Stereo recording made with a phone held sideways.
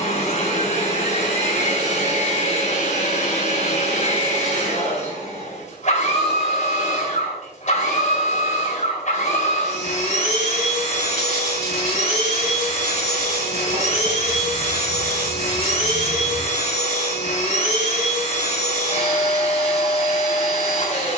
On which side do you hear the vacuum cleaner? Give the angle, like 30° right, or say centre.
50° left.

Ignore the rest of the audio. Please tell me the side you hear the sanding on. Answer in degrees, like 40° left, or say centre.
70° right.